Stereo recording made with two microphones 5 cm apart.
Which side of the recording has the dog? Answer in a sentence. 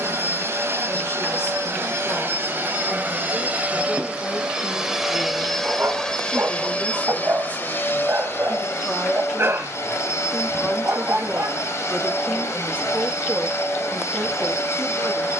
In this clip you hear the dog on the right.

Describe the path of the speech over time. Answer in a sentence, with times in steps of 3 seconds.
You can hear the speech on the left from 0 s, in the centre from 9 s and on the right from 12 s.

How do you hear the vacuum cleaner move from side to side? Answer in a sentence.
In this clip you hear the vacuum cleaner move from right to left.